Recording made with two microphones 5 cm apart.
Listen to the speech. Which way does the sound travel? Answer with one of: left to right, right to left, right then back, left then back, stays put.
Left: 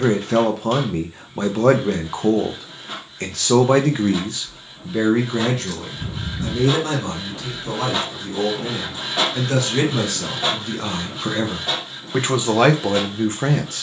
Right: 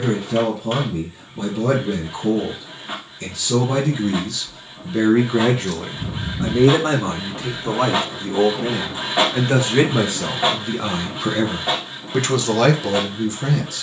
right then back.